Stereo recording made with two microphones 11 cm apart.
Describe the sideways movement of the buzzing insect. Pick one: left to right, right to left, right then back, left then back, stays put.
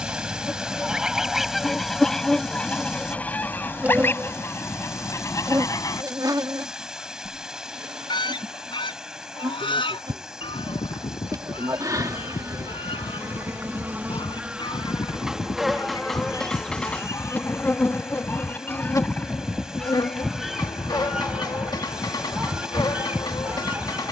right then back.